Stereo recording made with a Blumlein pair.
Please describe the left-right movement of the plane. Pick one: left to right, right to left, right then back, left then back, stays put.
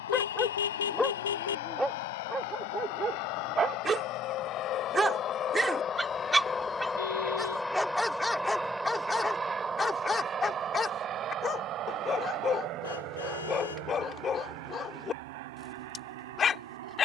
left to right.